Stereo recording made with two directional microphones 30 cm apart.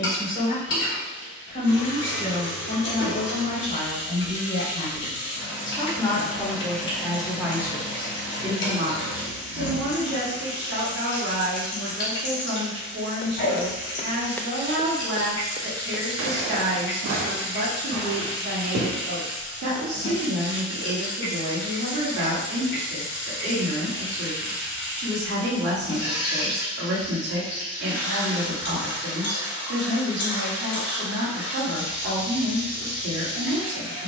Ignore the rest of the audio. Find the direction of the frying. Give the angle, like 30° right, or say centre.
40° left.